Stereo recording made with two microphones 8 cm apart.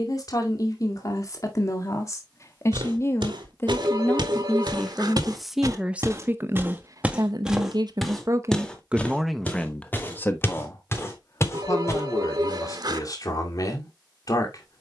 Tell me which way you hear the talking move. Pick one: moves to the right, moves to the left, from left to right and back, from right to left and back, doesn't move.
from left to right and back.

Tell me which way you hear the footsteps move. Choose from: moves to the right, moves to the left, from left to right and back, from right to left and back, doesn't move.
moves to the left.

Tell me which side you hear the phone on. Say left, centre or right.
right.